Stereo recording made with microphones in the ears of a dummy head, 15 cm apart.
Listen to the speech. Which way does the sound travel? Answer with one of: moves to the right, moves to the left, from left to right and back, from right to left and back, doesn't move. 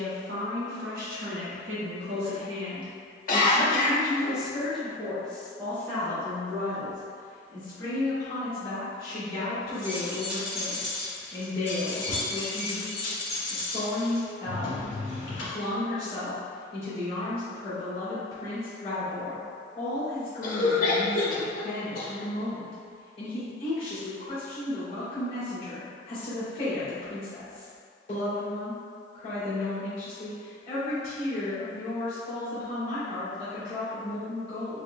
moves to the left.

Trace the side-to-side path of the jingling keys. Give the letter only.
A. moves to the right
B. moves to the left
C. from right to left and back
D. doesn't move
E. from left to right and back
B.